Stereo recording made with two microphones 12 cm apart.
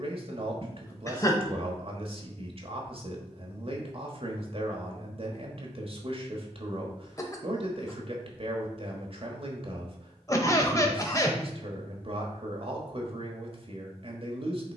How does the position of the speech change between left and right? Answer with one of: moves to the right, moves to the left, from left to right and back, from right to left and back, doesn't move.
doesn't move.